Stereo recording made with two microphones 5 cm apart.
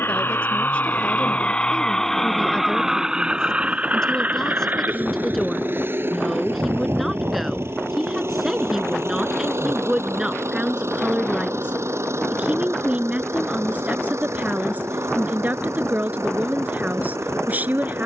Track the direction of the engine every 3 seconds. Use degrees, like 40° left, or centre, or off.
20° left, 30° right, 50° right, 60° right, 60° right, 70° right.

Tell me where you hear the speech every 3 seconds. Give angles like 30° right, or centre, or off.
20° left, 10° left, 10° right, 20° right, 30° right, 40° right.